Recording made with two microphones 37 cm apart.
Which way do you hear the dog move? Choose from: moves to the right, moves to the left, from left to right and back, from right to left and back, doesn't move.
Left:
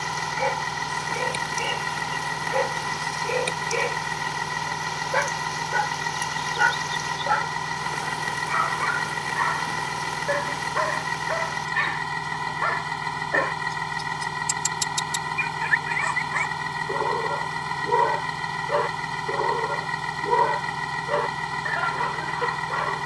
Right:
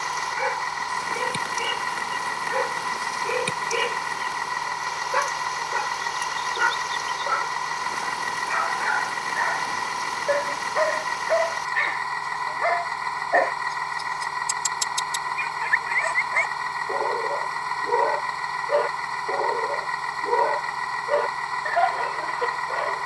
moves to the left.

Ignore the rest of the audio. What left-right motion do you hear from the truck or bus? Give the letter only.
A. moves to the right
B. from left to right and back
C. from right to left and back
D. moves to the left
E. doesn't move
E.